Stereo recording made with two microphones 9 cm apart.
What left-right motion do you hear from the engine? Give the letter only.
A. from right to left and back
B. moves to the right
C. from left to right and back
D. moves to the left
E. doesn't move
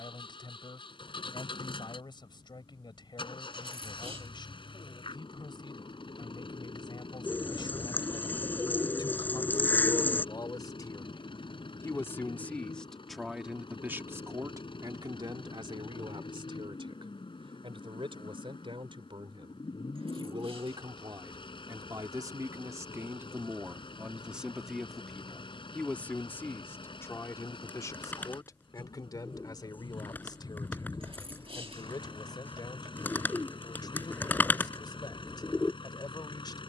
E.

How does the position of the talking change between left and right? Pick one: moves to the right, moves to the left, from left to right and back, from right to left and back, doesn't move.
from left to right and back.